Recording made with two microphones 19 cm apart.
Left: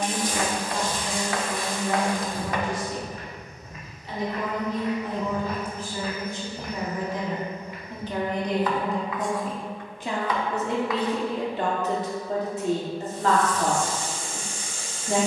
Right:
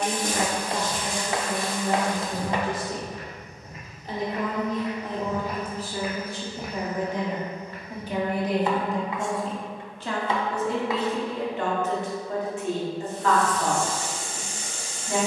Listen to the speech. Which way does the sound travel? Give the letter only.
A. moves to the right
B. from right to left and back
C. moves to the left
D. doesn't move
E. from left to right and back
C.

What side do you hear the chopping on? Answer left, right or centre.
right.